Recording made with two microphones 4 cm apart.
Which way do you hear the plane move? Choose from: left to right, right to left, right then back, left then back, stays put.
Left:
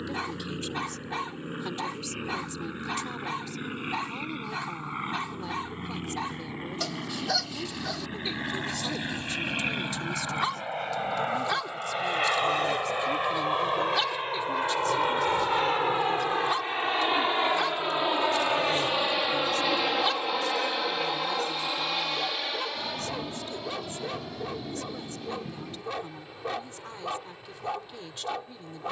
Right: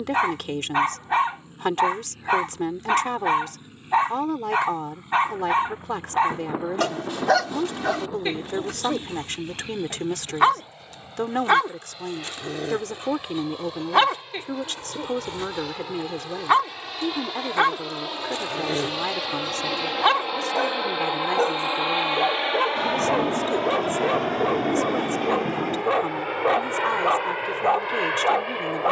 left to right.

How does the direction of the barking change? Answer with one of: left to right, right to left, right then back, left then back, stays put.
stays put.